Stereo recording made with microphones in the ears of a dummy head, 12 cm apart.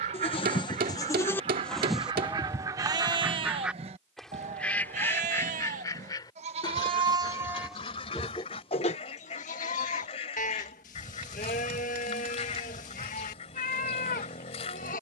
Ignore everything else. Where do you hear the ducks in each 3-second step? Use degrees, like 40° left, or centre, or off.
40° right, 10° left, 40° left, 50° left, 50° left.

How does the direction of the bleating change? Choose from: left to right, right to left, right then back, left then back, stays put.
right then back.